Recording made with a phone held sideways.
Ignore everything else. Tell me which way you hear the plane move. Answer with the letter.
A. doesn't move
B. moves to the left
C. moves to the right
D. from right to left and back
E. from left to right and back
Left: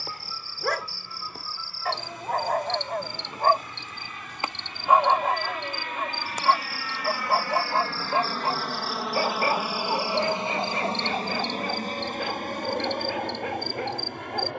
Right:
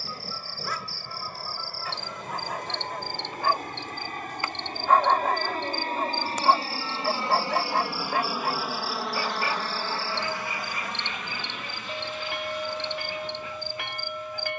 B.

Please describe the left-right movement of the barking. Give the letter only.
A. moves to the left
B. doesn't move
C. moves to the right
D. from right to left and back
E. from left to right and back
E.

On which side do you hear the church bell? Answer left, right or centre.
right.